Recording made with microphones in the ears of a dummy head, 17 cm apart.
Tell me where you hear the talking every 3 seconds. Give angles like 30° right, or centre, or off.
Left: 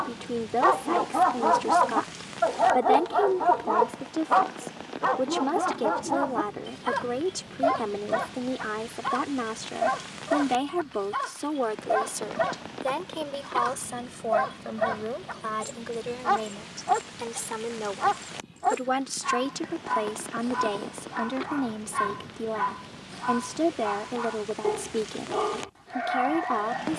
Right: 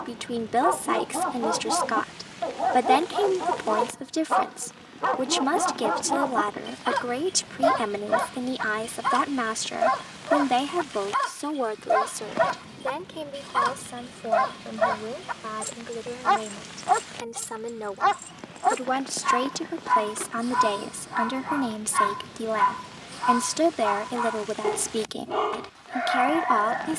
60° right, 60° right, 60° right, 30° right, 20° left, 10° left, 20° right, 50° right, 50° right.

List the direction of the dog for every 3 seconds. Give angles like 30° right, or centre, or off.
50° left, 10° left, 30° right, 30° right, 30° right, 30° right, 30° right, 30° right, 30° right.